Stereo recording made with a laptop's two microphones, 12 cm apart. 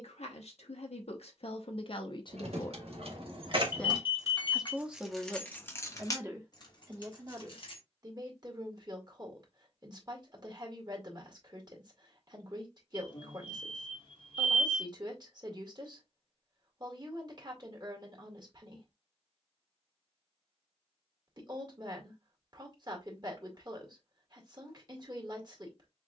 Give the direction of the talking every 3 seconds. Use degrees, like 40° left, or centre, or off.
50° left, centre, 30° right, 40° right, 40° right, 40° right, 40° right, 40° right, 40° right.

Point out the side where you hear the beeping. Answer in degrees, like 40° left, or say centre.
50° left.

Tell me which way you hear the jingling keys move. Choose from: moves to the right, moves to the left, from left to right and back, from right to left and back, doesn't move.
moves to the left.